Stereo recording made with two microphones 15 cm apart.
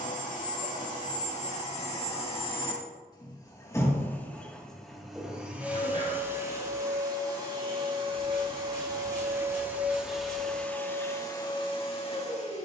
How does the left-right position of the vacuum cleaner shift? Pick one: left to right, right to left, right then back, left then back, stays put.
right then back.